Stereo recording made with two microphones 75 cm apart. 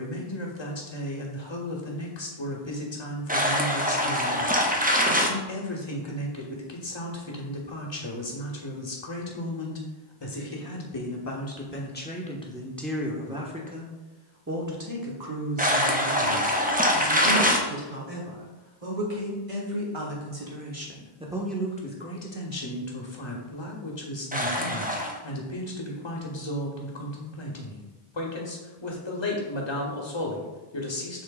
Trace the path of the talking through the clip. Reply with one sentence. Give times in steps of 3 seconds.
In this clip you hear the talking on the left from 0 s, in the centre from 12 s, on the right from 15 s and on the left from 21 s.